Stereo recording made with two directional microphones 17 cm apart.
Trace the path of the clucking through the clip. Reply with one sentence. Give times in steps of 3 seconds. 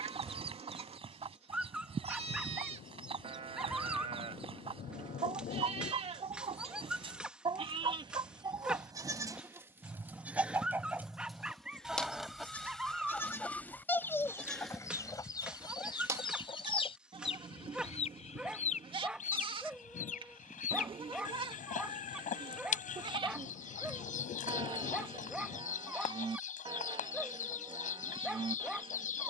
You can hear the clucking on the right from 0 s, in the centre from 9 s and on the left from 15 s.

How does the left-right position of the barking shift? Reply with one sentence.
In this clip you hear the barking stay in one place.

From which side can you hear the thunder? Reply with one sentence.
You can hear the thunder on the left.